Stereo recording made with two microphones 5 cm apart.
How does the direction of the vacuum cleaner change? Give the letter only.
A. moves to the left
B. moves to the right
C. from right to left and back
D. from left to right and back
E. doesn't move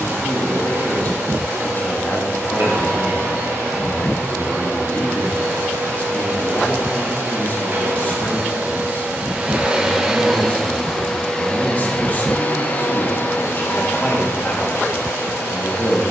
A.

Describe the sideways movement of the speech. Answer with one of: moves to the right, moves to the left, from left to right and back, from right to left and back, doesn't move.
doesn't move.